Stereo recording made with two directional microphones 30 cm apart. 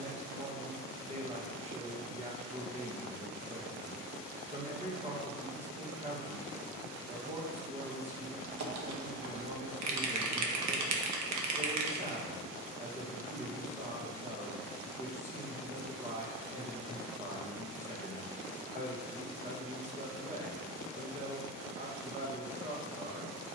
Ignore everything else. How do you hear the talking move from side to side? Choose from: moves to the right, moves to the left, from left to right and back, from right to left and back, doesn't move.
doesn't move.